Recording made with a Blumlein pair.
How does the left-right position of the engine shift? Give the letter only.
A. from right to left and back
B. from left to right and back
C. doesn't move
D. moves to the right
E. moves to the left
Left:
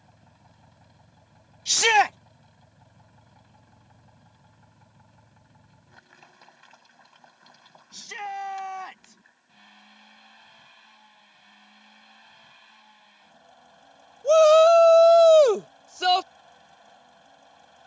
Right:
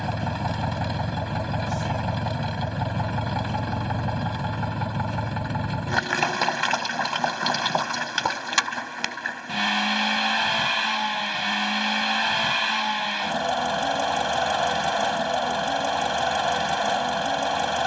C.